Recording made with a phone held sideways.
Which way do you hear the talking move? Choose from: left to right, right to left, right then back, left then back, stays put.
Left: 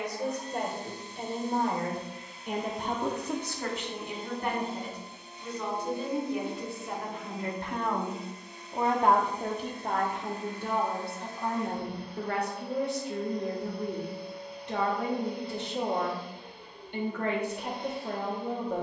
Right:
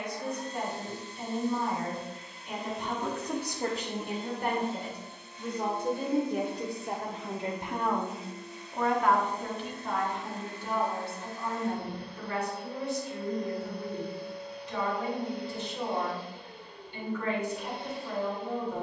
right then back.